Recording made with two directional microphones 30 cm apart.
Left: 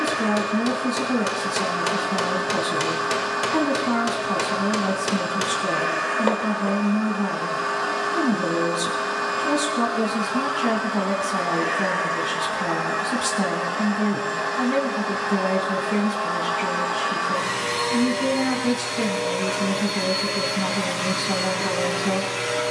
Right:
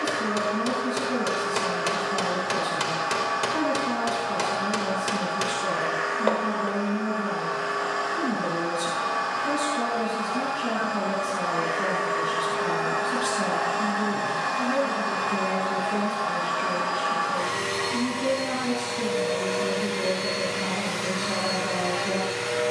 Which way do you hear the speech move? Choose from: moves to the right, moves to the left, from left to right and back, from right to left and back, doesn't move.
doesn't move.